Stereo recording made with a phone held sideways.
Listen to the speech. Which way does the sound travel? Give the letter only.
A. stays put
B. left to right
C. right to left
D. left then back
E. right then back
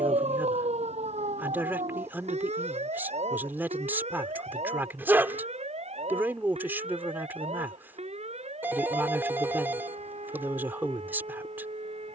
A.